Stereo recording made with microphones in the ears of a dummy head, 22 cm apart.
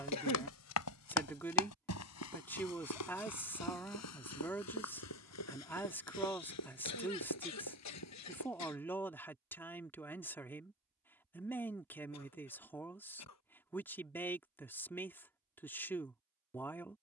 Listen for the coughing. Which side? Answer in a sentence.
In this clip you hear the coughing on the left.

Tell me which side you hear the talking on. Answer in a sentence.
In this clip you hear the talking in the centre.